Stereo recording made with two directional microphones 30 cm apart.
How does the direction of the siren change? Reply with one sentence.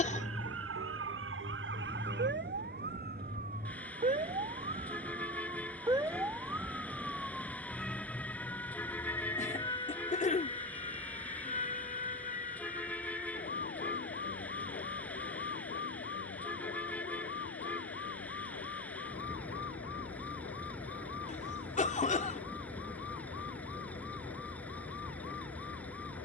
You can hear the siren go from the right side to the left.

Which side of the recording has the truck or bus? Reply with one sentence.
In this clip you hear the truck or bus in the centre.